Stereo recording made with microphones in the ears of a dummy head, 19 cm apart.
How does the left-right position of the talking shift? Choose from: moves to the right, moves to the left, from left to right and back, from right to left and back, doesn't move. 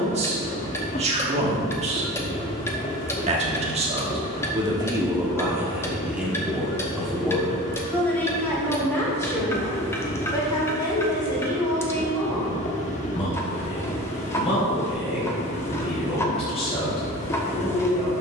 moves to the left.